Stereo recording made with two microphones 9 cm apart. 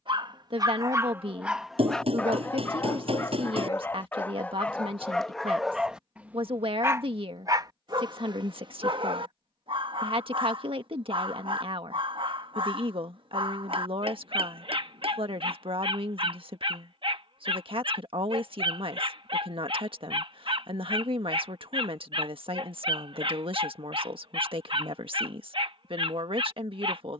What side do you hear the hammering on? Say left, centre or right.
right.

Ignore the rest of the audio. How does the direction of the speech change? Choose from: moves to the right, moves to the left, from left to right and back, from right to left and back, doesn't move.
doesn't move.